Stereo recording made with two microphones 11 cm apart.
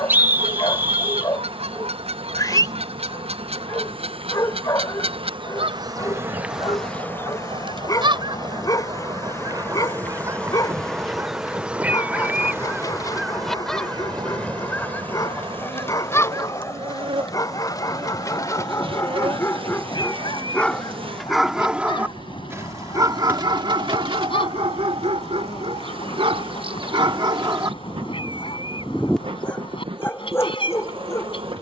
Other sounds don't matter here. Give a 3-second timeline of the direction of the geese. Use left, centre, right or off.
right, right, right, right, centre, left, left, left, left, left, left.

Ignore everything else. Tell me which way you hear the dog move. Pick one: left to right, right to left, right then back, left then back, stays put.
right then back.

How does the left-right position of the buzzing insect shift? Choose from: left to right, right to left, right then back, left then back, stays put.
left then back.